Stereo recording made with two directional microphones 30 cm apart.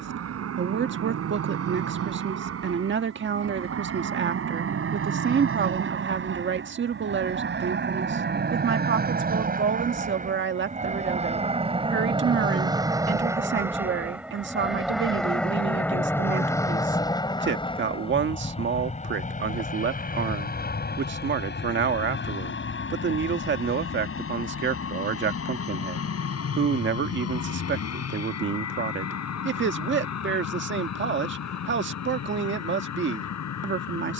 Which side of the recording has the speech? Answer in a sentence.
You can hear the speech on the right.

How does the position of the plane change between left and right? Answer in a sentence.
You can hear the plane move to the left.